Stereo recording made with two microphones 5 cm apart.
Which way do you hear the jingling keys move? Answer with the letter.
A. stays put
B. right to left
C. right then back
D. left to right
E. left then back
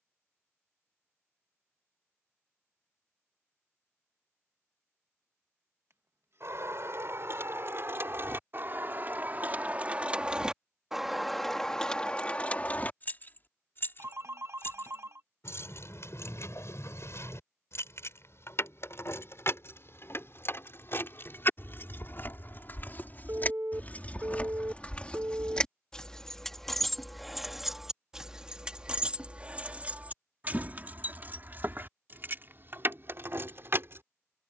E.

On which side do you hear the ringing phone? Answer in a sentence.
In this clip you hear the ringing phone on the right.